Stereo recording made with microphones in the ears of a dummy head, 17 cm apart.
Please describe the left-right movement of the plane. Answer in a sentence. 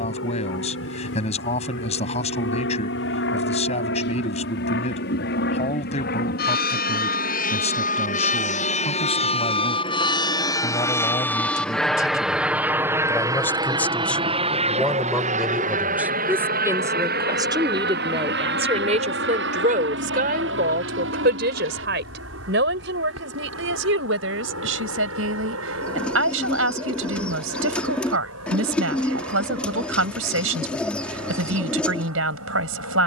In this clip you hear the plane go from the left side to the right.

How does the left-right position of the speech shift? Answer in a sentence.
You can hear the speech go from the left side to the right.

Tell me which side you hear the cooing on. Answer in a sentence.
In this clip you hear the cooing in the centre.